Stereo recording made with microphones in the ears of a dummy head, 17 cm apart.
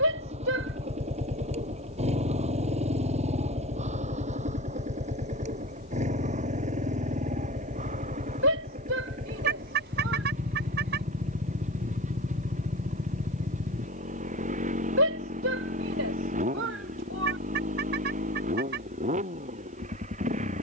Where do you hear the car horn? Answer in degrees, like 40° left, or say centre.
60° right.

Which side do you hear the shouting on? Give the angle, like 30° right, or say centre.
70° right.